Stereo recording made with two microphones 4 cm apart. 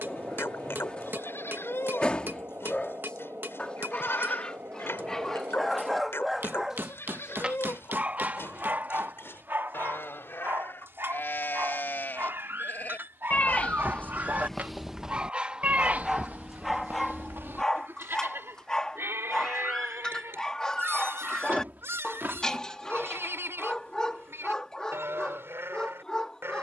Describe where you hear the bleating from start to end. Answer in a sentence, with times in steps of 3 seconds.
You can hear the bleating on the left from 0 s and on the right from 15 s.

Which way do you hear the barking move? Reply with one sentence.
You can hear the barking move from left to right and back again.